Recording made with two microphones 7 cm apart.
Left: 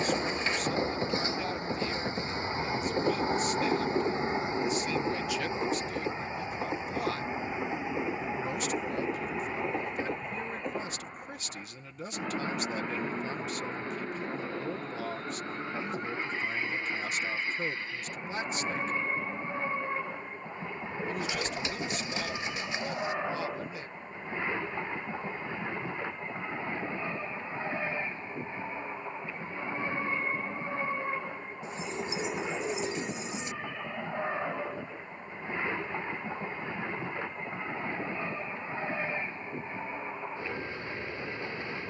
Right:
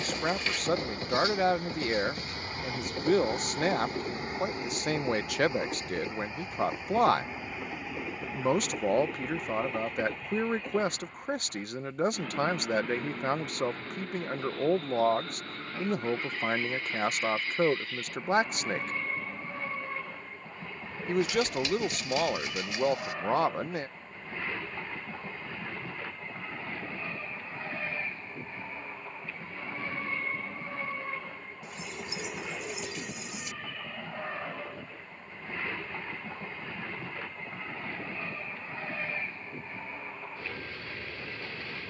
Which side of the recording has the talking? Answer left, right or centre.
right.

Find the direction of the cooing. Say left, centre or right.
left.